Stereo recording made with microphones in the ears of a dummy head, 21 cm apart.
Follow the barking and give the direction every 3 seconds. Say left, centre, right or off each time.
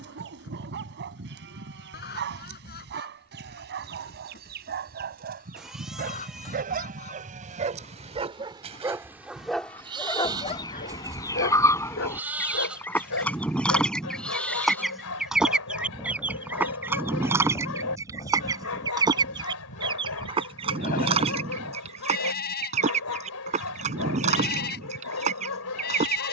right, right, right, left, left, left, left, left, left.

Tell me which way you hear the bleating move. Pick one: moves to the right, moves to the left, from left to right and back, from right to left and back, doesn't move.
moves to the left.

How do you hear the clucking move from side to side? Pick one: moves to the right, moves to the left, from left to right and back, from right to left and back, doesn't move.
moves to the right.